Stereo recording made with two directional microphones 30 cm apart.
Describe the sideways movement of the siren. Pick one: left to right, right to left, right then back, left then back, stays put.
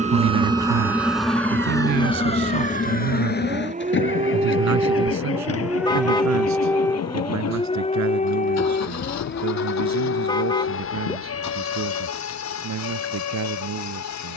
right to left.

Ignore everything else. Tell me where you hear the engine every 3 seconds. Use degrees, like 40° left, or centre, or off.
centre, 40° left, 60° left, 60° left, 70° left.